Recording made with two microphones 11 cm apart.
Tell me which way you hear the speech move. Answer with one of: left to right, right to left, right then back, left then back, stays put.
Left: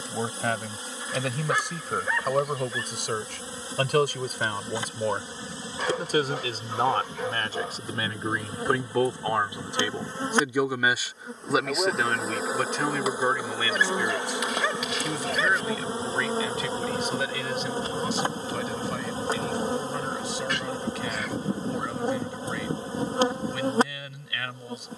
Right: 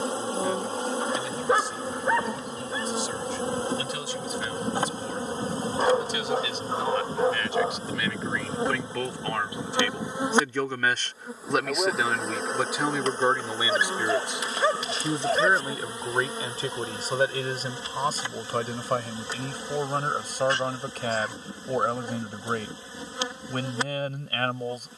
left to right.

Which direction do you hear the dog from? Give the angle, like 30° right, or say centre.
30° right.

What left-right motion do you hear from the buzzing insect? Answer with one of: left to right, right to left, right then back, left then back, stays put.
right to left.